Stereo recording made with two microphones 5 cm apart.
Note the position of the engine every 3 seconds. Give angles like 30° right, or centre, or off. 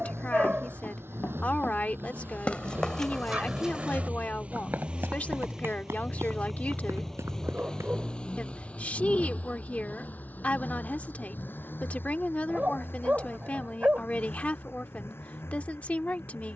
60° right, 30° right, 10° left, 40° left, 50° left, 60° left.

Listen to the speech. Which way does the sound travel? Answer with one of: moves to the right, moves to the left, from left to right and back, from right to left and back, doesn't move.
doesn't move.